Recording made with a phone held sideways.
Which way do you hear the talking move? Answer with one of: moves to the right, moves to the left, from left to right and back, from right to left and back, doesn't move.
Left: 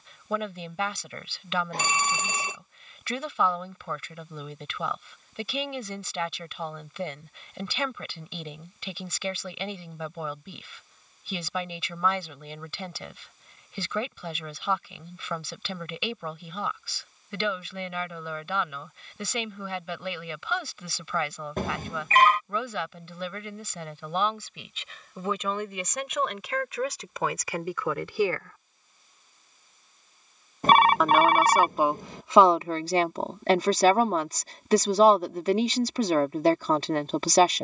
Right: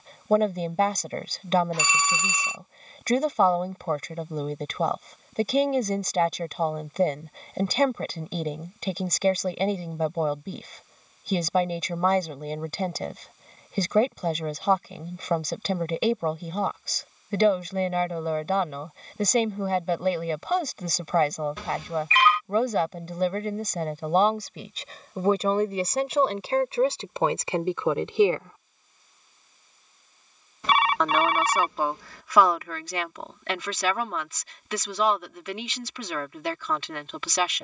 moves to the left.